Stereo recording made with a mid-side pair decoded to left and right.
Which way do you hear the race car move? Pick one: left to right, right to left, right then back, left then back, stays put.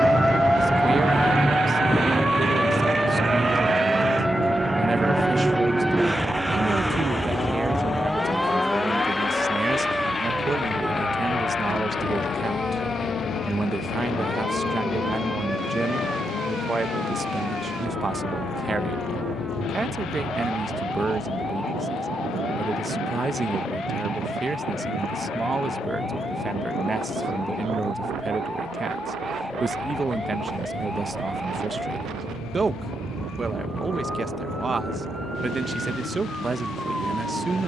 right to left.